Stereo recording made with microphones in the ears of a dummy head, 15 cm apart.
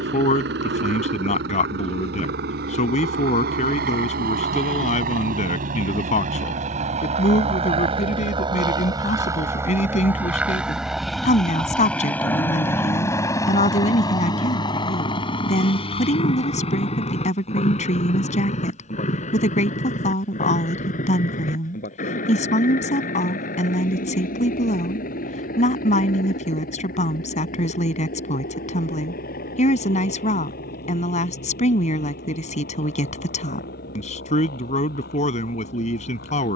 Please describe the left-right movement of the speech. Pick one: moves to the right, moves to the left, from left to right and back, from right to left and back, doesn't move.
doesn't move.